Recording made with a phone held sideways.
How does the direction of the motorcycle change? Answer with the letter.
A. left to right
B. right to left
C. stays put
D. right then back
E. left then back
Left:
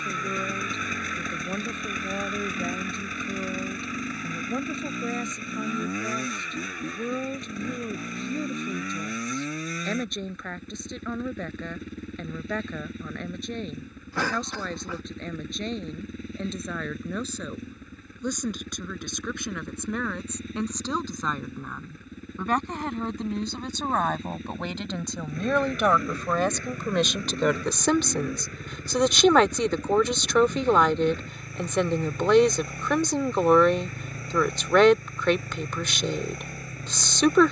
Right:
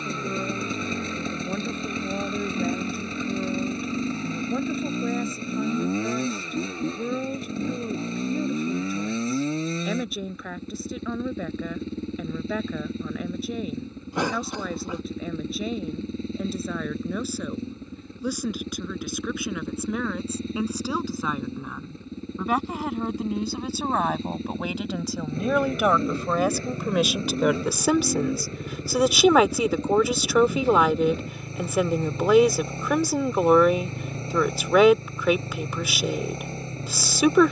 C.